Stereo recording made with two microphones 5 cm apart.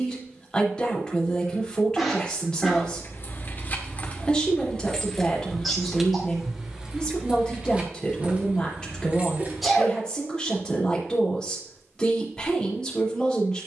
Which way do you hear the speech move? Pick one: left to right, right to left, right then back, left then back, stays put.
stays put.